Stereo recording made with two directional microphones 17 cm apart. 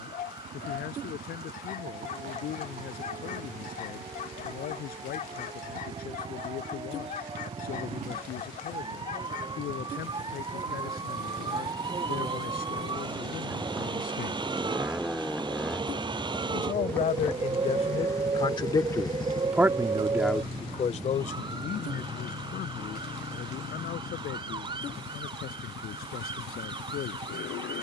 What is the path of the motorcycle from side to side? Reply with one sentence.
In this clip you hear the motorcycle move to the left.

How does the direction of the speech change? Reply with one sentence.
You can hear the speech go right and come back.